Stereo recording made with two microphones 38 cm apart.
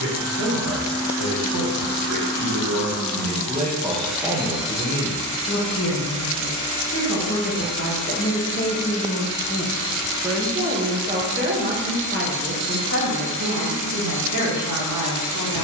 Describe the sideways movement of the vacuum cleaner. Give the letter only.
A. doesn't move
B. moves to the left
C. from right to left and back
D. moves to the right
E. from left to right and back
E.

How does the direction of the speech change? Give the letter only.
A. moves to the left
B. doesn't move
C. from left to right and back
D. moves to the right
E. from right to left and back
E.